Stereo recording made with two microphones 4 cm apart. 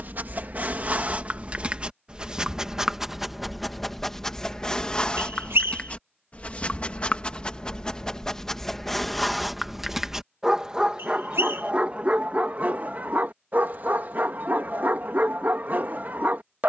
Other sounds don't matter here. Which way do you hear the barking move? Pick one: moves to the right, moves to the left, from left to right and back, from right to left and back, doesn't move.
from right to left and back.